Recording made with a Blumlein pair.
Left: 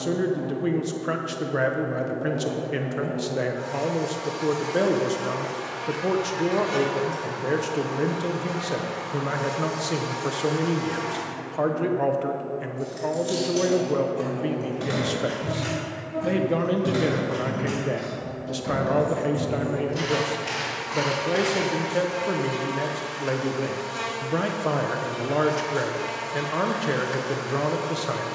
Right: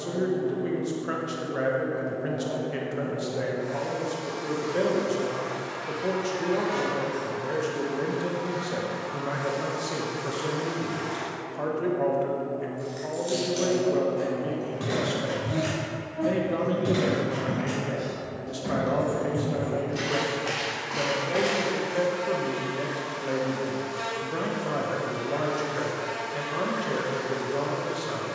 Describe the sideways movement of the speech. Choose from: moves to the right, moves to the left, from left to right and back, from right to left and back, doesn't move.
doesn't move.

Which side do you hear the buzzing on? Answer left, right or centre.
left.